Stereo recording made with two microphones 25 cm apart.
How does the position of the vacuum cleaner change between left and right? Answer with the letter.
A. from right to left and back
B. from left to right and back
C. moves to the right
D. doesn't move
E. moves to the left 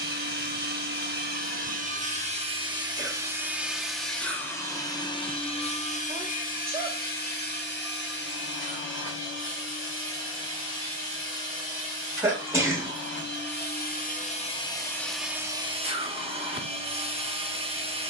A.